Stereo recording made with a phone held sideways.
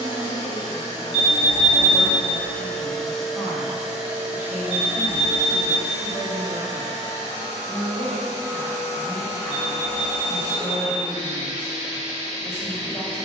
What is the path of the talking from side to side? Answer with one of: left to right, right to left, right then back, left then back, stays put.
stays put.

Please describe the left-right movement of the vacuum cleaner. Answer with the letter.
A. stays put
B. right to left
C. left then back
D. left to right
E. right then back
D.